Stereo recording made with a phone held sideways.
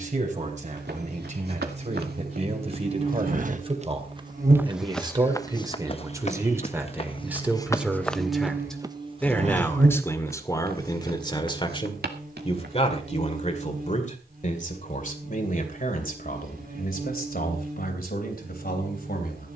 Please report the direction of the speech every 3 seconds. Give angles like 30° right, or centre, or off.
40° right, 30° right, 10° right, 20° left, 40° left, 60° left, 70° left.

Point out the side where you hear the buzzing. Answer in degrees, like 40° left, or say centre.
60° right.